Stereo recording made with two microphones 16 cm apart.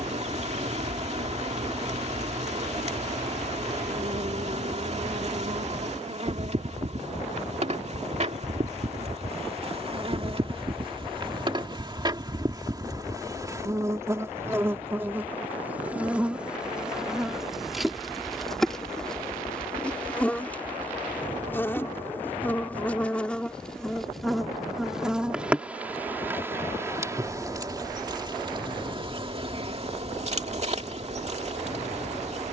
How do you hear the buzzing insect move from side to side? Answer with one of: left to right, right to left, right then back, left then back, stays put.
left then back.